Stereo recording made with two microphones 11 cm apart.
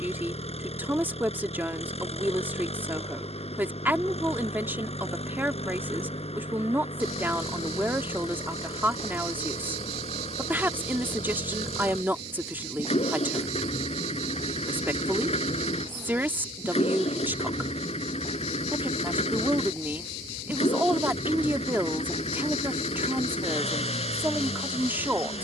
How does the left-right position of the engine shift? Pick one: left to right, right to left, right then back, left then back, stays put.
stays put.